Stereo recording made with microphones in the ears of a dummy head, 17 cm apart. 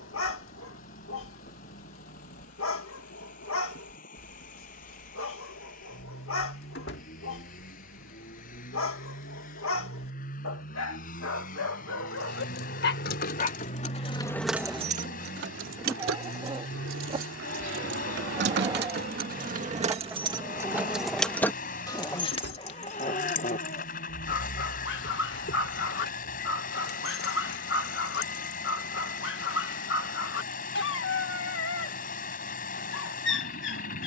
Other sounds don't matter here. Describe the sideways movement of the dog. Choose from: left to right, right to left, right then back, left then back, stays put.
right then back.